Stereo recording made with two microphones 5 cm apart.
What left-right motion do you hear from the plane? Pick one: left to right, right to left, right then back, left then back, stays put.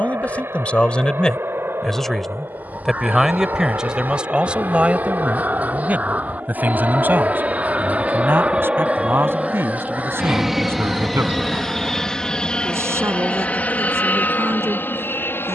right to left.